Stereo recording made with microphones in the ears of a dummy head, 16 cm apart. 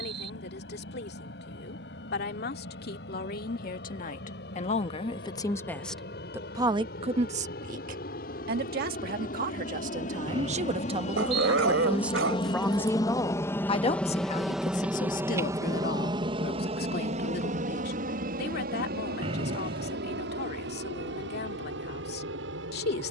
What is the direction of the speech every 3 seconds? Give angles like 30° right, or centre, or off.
70° left, 40° left, 40° right, 40° right, 20° left, 60° left, 70° left, 70° left.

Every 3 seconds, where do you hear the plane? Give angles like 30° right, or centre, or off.
70° left, 70° left, 60° left, 40° left, 10° left, 30° right, 50° right, 70° right.